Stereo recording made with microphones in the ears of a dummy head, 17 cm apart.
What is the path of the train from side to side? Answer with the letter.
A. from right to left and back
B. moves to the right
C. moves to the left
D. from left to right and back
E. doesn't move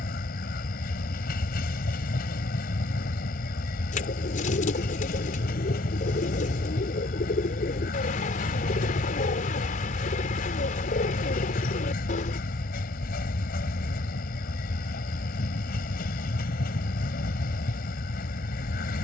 E.